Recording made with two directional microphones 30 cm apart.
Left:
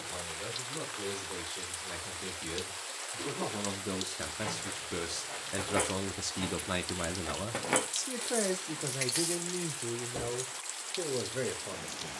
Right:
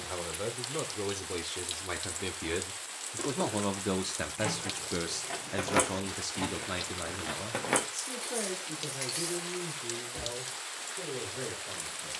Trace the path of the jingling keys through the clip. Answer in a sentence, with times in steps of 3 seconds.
You can hear the jingling keys not at all from 0 s, on the right from 3 s, in the centre from 6 s and on the left from 9 s.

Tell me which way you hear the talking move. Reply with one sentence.
In this clip you hear the talking go from the right side to the left.